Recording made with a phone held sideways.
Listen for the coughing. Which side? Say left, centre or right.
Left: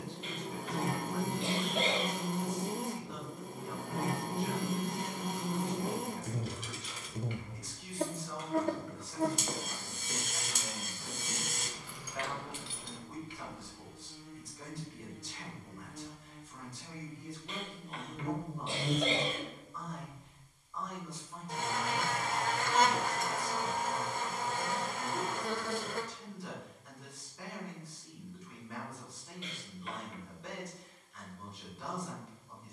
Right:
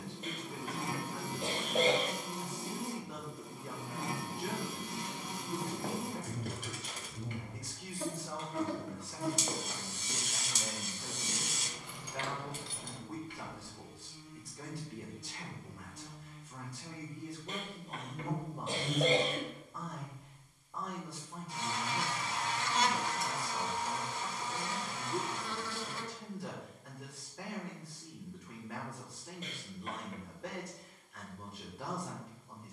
right.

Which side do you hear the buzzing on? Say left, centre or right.
left.